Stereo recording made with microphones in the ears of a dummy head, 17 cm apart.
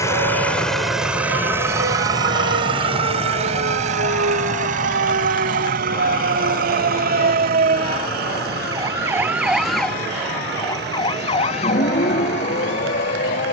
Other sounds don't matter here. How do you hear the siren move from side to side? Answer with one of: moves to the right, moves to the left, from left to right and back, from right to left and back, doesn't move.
moves to the left.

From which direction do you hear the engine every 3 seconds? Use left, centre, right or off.
centre, right, right, right, right.